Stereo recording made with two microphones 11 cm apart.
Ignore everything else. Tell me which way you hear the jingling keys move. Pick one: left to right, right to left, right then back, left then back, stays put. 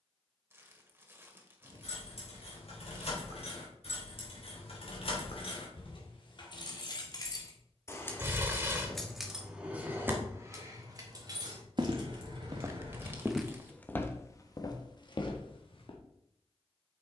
left to right.